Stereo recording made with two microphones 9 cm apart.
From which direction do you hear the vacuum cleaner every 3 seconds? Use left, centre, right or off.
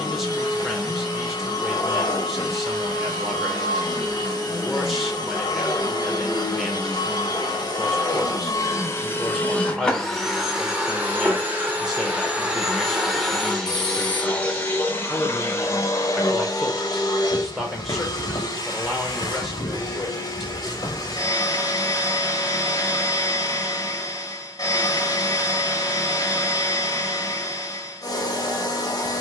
left, left, left, centre, centre, left, left, left, left, left.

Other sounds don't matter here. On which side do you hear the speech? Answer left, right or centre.
centre.